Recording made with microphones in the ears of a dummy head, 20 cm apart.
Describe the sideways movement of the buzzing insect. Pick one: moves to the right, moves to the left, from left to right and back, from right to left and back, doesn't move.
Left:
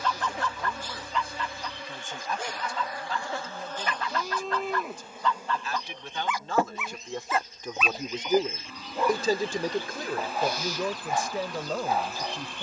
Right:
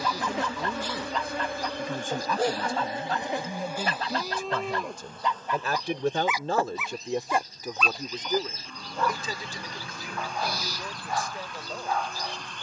moves to the left.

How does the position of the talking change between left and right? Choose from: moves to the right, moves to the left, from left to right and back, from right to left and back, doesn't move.
moves to the left.